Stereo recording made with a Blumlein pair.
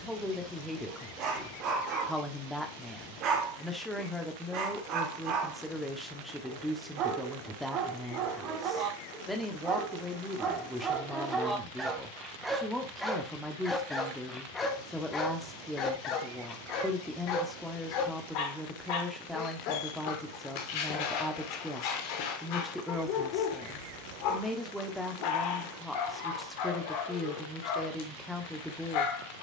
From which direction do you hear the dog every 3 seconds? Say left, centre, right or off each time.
right, right, right, right, centre, left, left, left, left, left.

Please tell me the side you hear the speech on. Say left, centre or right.
centre.